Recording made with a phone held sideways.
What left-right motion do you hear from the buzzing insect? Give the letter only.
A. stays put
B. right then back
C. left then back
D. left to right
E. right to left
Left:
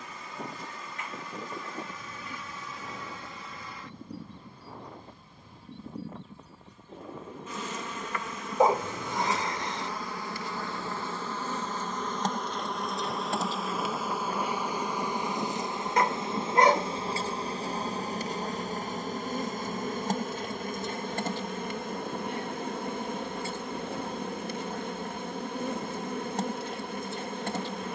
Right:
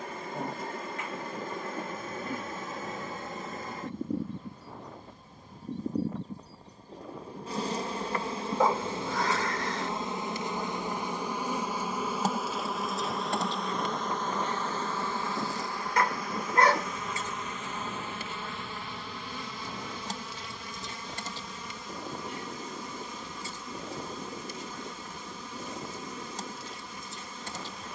E.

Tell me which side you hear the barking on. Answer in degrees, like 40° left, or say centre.
20° left.